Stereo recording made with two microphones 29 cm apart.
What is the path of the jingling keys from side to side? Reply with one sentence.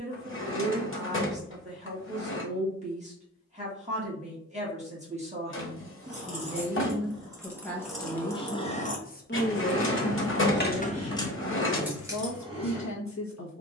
In this clip you hear the jingling keys move from right to left and back again.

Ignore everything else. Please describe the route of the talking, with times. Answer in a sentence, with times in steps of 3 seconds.
You can hear the talking on the right from 0 s, in the centre from 6 s and on the left from 9 s.